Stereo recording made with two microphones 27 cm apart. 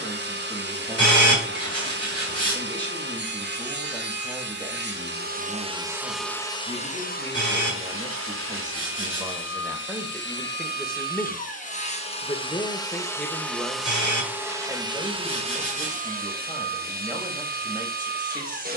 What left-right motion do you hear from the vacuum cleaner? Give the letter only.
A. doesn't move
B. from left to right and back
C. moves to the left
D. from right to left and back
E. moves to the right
D.